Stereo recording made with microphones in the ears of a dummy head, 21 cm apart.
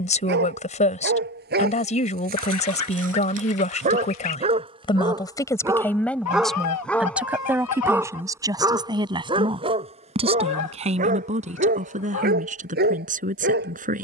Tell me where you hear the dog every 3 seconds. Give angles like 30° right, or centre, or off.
40° right, 20° right, centre, 30° right, 40° right.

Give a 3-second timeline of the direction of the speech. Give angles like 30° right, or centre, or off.
30° left, 20° left, 10° right, 30° right, 30° right.